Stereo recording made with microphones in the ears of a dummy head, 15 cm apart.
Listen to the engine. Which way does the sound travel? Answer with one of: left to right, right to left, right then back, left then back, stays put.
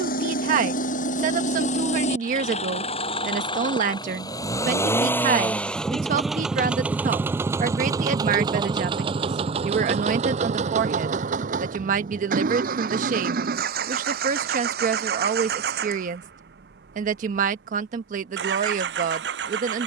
left to right.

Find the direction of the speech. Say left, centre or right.
right.